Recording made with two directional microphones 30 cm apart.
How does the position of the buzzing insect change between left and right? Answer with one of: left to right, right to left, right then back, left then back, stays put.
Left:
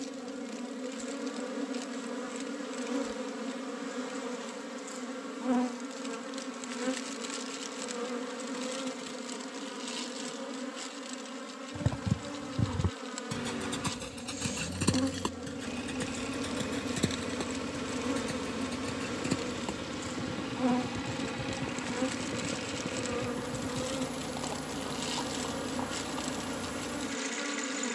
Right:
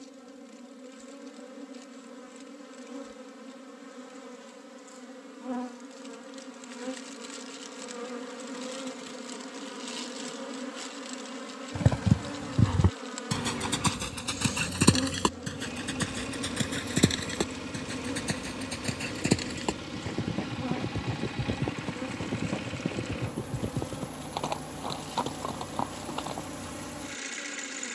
right then back.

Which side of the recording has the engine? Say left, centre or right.
centre.